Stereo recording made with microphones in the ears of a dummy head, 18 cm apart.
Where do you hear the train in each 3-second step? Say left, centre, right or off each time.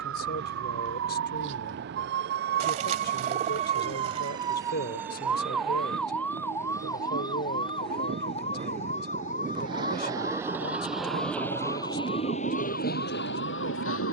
right, right, right, centre, left.